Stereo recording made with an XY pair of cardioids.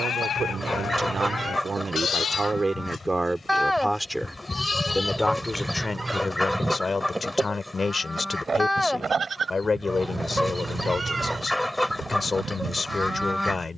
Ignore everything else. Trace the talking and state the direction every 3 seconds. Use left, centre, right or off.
right, centre, left, left, left.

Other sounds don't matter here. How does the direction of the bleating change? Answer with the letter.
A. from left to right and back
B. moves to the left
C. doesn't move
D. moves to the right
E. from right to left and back
D.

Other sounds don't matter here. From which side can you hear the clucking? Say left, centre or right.
centre.